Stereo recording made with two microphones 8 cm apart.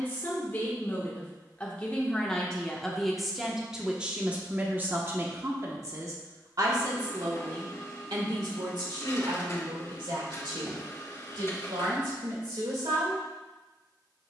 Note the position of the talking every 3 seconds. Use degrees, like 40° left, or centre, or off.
20° left, 20° right, 60° right, 80° right, 80° right.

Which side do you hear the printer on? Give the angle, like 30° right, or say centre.
40° left.